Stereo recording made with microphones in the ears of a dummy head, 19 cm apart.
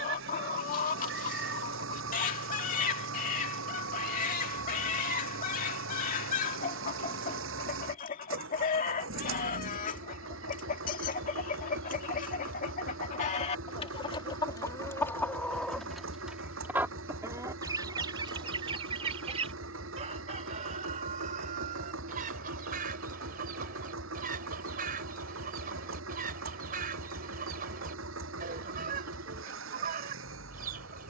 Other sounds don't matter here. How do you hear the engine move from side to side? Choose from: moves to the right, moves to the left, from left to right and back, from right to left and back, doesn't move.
doesn't move.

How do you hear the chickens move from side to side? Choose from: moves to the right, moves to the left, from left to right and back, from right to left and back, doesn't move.
moves to the right.